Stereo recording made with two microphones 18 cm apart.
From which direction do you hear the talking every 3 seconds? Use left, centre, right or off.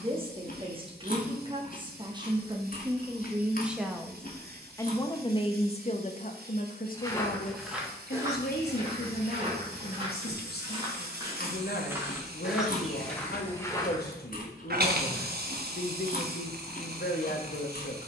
right, centre, left, left, left, left.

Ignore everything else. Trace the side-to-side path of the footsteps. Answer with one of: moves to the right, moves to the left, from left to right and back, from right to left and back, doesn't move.
from left to right and back.